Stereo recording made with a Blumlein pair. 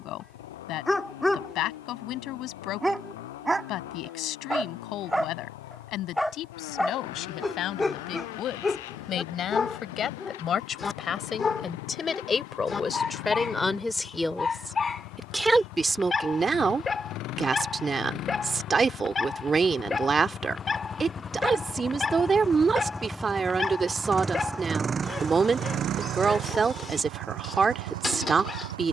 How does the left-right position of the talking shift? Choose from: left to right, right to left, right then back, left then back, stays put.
left to right.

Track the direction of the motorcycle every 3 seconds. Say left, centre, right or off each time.
left, left, left, left, left, left, left, centre, right, right.